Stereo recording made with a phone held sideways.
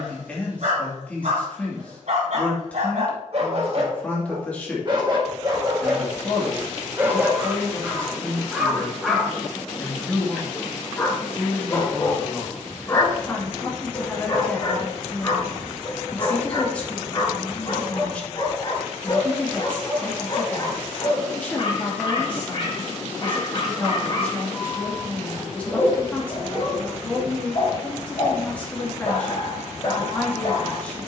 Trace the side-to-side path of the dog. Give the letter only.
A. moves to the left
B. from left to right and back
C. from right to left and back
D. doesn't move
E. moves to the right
A.